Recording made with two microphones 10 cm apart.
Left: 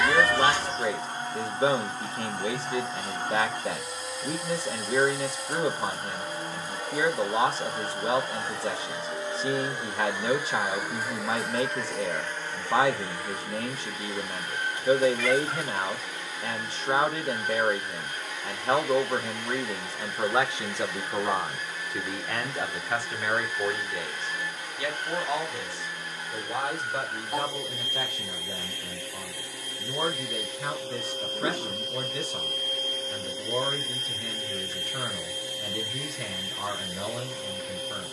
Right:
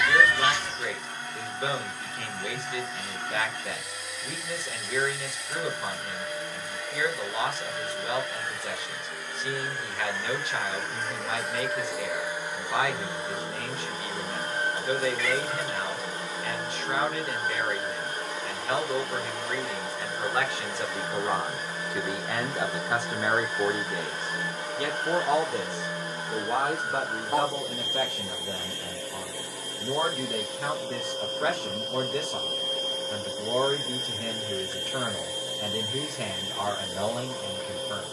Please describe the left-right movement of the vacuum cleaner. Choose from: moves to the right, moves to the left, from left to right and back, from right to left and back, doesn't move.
moves to the right.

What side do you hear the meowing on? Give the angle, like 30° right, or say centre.
40° left.